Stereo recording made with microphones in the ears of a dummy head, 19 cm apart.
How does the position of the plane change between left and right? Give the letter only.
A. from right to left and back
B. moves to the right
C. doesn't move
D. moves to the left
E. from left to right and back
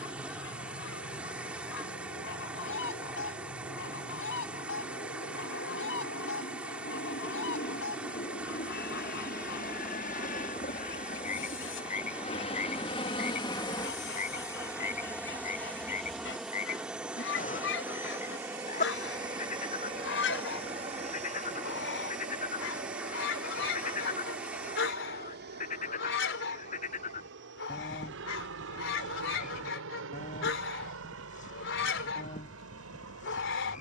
B.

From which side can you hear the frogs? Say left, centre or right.
left.